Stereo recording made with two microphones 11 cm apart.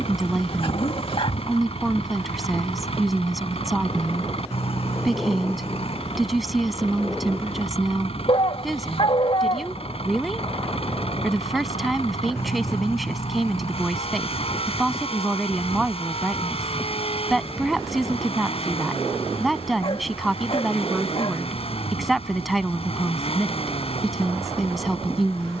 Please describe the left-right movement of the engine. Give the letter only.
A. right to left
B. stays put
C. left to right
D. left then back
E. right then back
B.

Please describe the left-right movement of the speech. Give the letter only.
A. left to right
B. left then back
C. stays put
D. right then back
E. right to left
C.